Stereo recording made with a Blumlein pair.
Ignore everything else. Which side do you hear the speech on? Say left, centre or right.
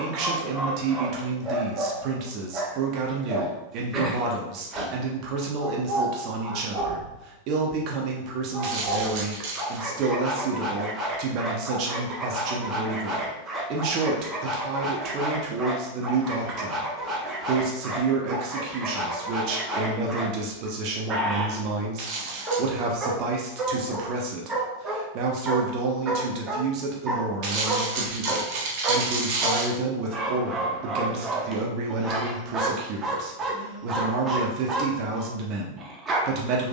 right.